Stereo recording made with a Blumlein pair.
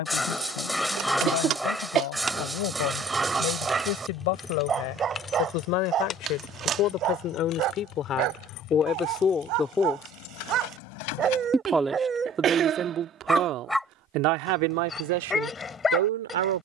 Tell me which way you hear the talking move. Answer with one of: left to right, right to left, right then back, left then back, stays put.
left to right.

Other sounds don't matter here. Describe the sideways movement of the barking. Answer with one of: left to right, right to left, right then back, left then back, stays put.
right then back.